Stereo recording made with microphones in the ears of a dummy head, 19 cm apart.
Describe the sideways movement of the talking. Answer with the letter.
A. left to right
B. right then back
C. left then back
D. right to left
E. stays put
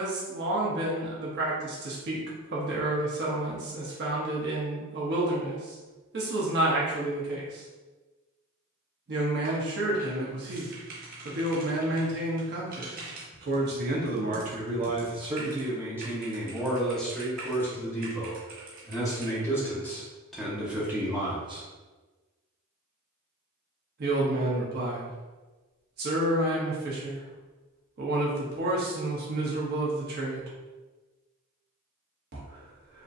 C.